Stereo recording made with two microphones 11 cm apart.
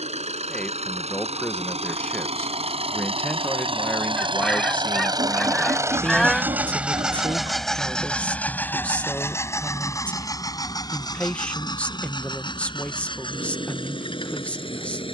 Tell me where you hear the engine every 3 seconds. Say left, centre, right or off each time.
right, right, centre, left, left.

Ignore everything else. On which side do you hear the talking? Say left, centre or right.
centre.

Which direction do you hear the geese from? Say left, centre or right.
centre.